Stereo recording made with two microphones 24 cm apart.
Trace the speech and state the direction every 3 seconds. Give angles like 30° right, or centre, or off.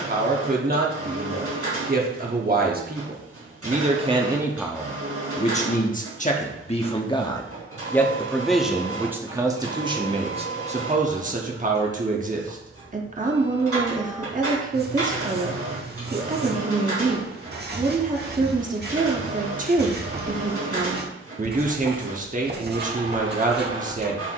40° right, centre, 10° left, 20° right, 30° right, 30° right, 30° right, 30° right.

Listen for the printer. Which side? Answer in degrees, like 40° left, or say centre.
70° right.